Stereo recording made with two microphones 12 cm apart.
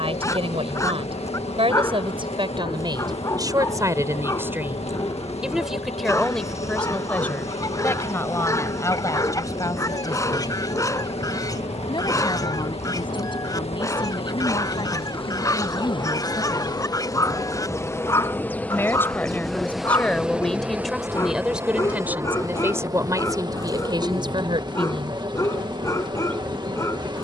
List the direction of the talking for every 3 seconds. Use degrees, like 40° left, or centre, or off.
50° right, 20° right, 10° left, 30° left, 40° left, 30° left, 10° left, 20° right, 40° right.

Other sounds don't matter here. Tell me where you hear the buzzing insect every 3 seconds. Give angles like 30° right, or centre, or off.
60° left, 60° left, 60° left, 60° left, 60° left, 40° left, centre, 30° right, 40° right.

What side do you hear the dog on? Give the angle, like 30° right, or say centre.
30° left.